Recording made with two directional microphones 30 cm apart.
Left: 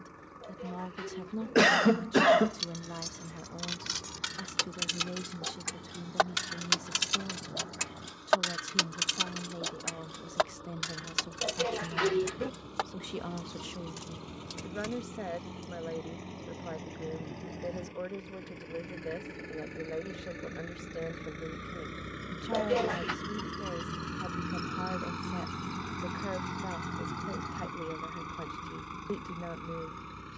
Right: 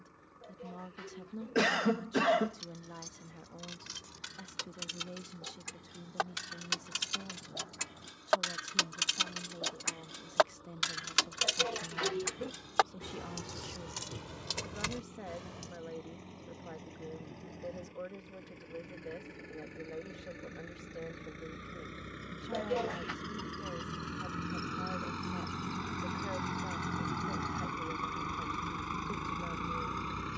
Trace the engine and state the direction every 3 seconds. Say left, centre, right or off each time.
left, left, left, left, left, left, left, left, centre, right.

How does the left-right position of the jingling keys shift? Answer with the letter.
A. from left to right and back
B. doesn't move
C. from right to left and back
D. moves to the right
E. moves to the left
D.